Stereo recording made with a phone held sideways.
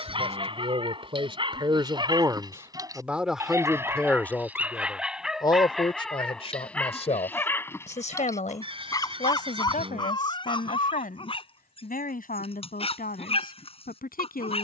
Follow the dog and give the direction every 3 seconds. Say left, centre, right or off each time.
right, centre, centre, left, left.